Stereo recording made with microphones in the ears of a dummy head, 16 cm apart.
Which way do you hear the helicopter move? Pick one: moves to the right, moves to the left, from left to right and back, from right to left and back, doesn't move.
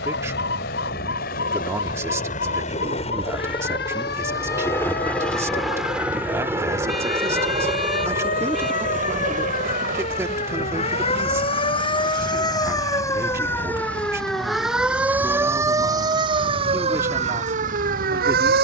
moves to the right.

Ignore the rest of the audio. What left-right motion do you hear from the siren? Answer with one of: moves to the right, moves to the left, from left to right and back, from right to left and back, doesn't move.
moves to the right.